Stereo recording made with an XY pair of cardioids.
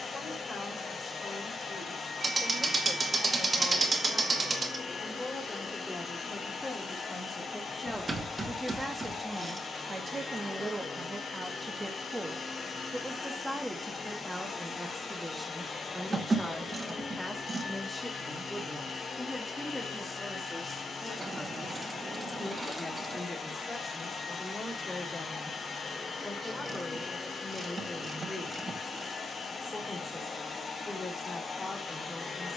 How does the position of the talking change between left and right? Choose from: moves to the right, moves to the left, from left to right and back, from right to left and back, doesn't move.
from left to right and back.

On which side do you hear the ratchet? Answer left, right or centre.
right.